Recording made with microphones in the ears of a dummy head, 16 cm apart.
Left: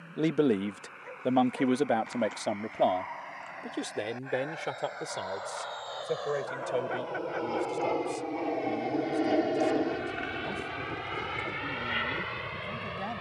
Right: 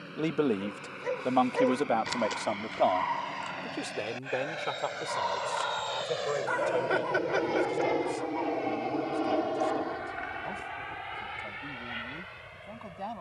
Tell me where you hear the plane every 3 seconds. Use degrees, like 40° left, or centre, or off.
50° right, 40° right, 10° right, 40° left, 70° left.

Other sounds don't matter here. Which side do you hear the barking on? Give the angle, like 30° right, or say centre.
80° right.